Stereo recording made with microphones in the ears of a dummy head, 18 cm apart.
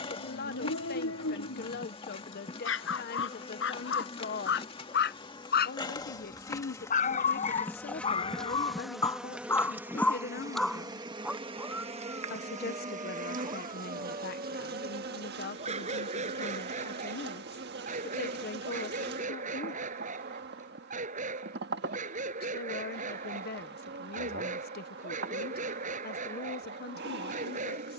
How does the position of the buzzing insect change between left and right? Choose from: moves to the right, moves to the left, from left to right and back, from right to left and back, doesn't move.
moves to the right.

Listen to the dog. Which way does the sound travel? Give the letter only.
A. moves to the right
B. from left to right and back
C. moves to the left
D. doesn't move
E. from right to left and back
A.